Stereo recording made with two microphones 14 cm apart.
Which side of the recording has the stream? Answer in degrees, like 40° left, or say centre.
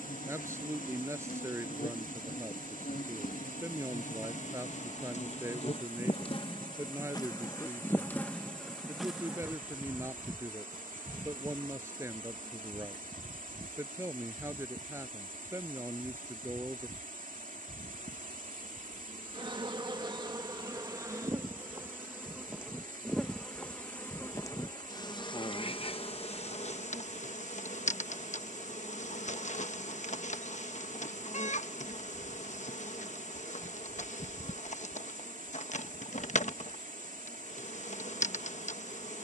70° right.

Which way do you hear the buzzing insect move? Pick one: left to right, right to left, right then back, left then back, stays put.
right then back.